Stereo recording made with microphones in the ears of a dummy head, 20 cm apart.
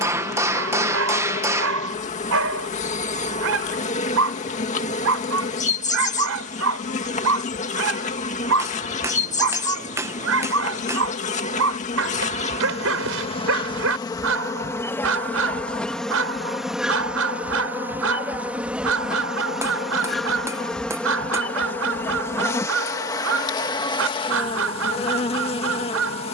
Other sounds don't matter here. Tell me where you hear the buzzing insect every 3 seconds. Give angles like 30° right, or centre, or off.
30° left, 30° left, 30° left, 30° left, 20° left, centre, centre, 10° left, 30° left.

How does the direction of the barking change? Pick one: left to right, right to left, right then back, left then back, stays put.
stays put.